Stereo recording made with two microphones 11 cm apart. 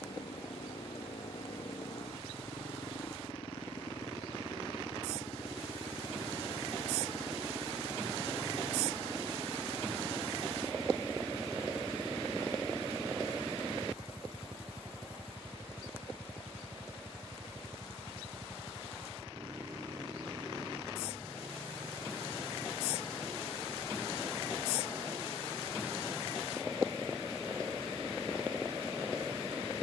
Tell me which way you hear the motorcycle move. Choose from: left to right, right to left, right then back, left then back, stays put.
left to right.